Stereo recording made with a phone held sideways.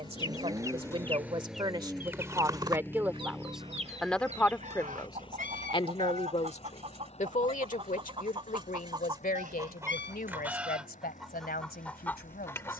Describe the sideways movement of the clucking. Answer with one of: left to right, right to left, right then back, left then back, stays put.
right then back.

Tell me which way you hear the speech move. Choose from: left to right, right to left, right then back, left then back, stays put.
right to left.